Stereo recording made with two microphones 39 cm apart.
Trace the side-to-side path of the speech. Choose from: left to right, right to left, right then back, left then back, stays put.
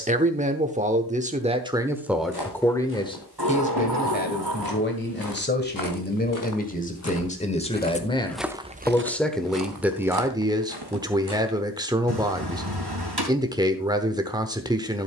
left then back.